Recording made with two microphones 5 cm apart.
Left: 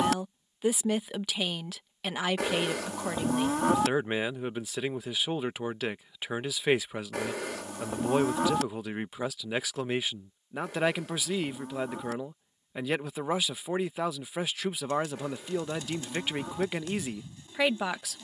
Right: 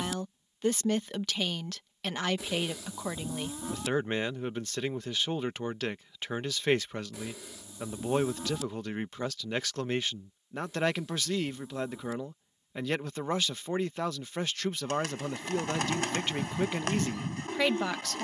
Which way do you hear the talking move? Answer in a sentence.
In this clip you hear the talking stay put.